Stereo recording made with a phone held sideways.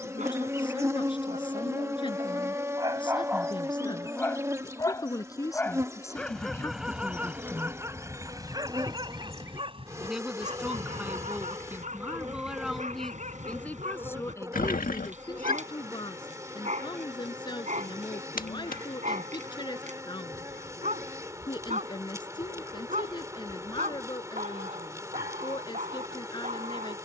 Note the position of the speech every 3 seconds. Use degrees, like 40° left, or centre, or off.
30° left, 30° left, 10° left, 10° right, 10° left, 30° left, 30° left, 30° left, 30° left.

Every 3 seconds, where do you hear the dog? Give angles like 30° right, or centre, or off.
50° right, centre, 10° right, 40° right, 50° right, 50° right, 50° right, 50° right, 50° right.